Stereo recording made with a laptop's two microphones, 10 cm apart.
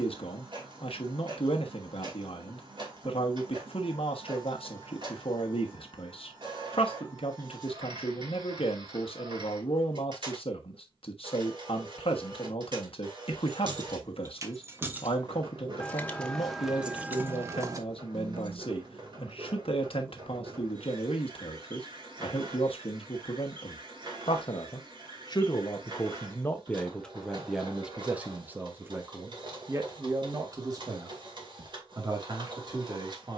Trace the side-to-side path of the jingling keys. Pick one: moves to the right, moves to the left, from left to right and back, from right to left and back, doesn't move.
from right to left and back.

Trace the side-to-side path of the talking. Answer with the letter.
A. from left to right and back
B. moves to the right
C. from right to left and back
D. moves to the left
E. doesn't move
B.